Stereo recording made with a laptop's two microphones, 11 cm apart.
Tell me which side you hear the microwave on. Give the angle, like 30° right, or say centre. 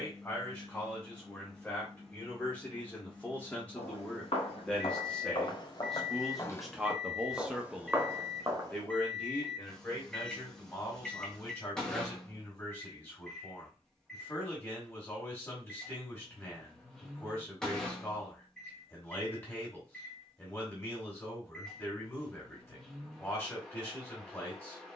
10° left.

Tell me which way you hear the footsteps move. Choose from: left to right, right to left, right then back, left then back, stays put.
left to right.